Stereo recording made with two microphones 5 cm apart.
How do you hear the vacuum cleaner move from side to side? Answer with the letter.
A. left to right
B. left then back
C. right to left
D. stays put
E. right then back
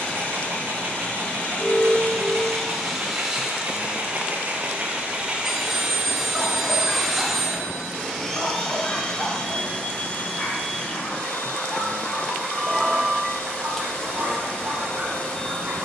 E.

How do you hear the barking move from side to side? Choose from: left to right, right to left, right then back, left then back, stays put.
left then back.